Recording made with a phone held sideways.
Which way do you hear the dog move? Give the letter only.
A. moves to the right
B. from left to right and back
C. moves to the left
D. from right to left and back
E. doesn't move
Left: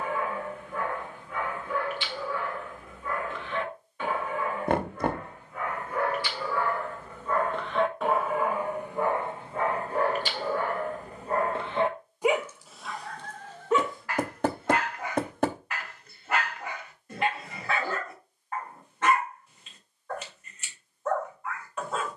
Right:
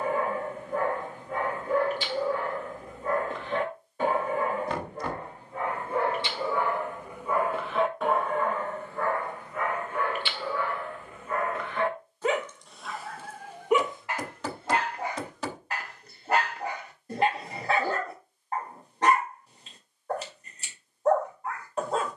D.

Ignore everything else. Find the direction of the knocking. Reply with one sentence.
In this clip you hear the knocking on the left.